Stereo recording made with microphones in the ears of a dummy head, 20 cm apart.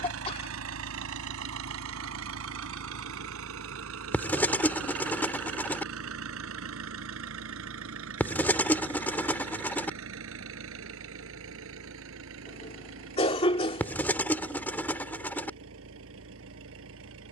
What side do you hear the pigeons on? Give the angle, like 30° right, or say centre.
10° left.